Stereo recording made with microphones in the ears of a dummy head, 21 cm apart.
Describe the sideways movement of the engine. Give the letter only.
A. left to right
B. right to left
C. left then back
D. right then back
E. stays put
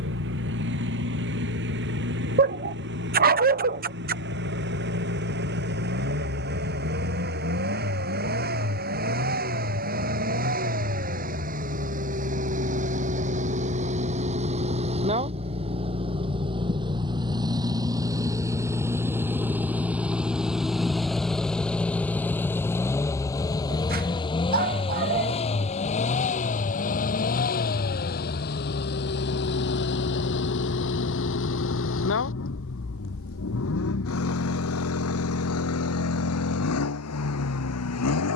B.